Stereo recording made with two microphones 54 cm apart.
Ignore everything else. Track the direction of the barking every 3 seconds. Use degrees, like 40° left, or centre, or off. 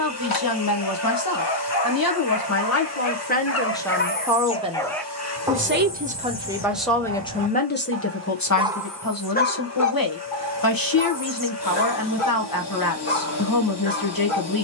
50° left, 10° left, 20° right, 40° left, 60° left.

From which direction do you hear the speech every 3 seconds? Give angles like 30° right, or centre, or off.
40° left, centre, 10° left, 40° left, 40° left.